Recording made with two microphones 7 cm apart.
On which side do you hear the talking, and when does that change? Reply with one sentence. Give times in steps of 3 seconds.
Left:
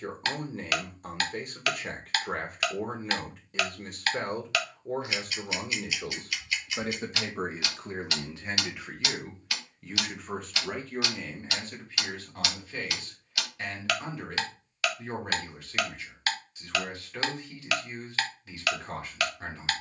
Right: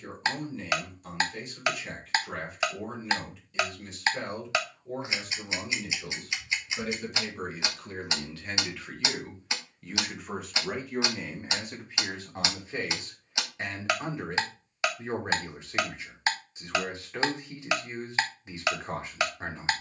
In this clip you hear the talking on the left from 0 s, in the centre from 9 s and on the right from 12 s.